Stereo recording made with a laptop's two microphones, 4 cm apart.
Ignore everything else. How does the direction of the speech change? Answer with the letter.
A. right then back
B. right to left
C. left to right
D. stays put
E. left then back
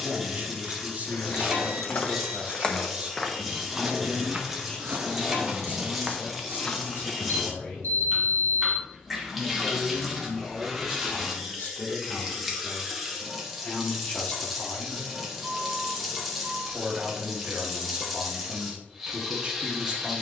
E.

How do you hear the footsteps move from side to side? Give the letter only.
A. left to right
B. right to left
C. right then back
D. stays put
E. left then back
C.